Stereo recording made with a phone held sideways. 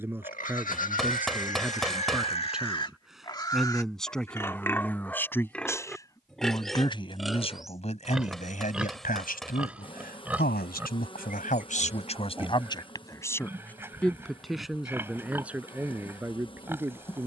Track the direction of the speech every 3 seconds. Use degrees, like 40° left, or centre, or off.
10° right, 10° left, 40° left, 60° left, 20° left, 10° right.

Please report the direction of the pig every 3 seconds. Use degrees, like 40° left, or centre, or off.
50° left, 10° left, centre, 10° right, 10° right, 10° right.